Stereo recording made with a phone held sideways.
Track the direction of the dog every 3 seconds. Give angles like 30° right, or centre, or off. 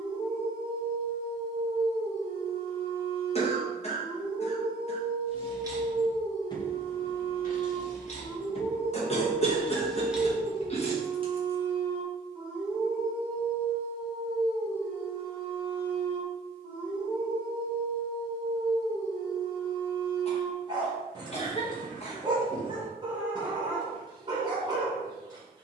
30° right, 30° right, 30° right, 20° right, 10° left, 10° right, 20° right, 20° right, 20° right.